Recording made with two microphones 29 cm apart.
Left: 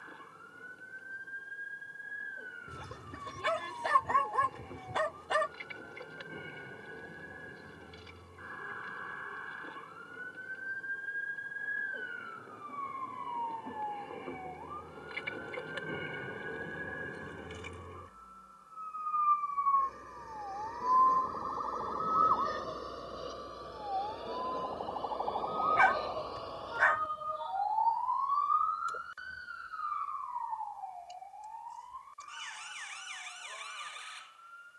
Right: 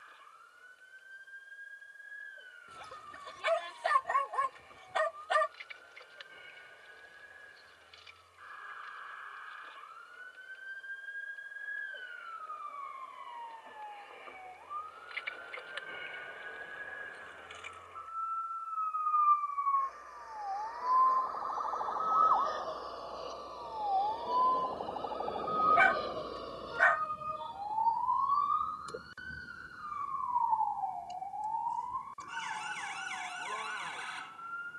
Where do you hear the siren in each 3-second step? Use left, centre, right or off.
left, left, left, left, left, left, left, left, centre, right, right, right.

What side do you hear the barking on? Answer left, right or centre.
left.